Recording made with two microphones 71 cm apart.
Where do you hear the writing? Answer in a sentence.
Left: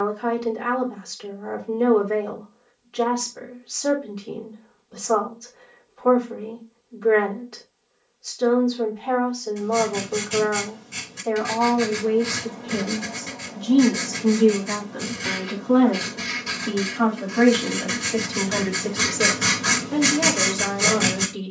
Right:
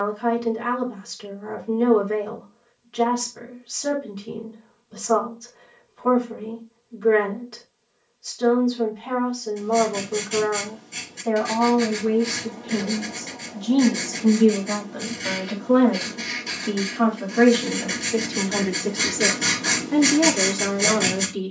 You can hear the writing on the left.